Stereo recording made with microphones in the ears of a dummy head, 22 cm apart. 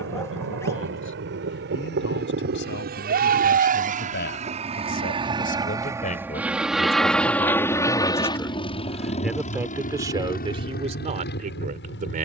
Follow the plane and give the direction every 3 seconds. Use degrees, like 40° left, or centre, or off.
60° right, 30° right, 10° left, 40° left.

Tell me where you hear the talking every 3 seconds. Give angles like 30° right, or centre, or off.
50° left, 40° left, 20° left, 20° right.